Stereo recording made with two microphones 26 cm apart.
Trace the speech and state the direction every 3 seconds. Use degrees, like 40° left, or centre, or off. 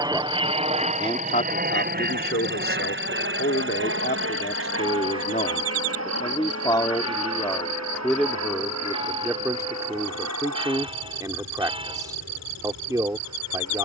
30° left, 40° left, 10° left, 10° right, 10° right.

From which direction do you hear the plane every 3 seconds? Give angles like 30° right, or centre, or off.
30° right, 50° right, 60° right, 70° right, 70° right.